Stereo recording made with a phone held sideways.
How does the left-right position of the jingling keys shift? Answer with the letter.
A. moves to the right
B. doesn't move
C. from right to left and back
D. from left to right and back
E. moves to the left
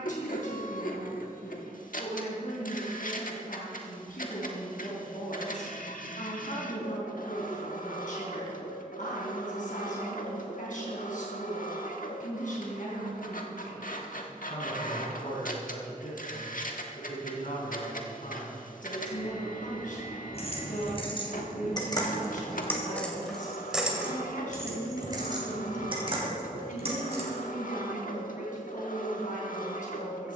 A.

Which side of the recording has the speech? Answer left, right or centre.
left.